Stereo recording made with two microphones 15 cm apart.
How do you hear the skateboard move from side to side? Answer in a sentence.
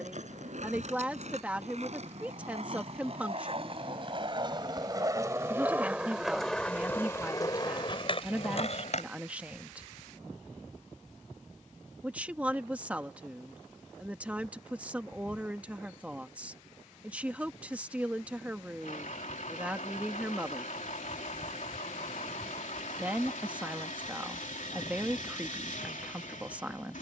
You can hear the skateboard move to the left.